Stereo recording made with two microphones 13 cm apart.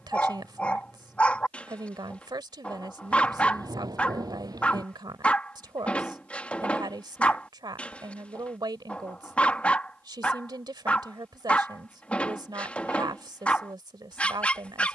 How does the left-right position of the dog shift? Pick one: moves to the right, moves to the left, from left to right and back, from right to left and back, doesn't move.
doesn't move.